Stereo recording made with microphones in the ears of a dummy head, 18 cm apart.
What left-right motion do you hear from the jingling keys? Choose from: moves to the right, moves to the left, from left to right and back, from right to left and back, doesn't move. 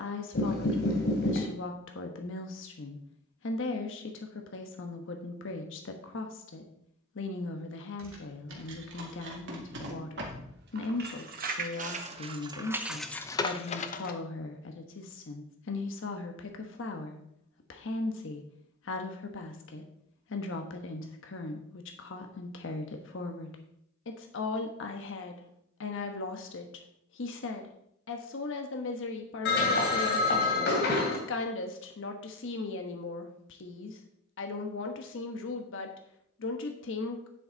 moves to the left.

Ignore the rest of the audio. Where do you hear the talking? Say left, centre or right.
left.